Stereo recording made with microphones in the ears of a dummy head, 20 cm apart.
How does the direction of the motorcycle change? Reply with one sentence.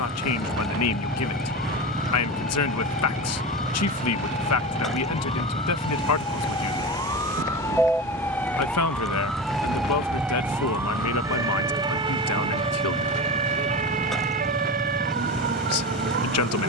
You can hear the motorcycle stay in one place.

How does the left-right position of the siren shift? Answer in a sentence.
In this clip you hear the siren move to the right.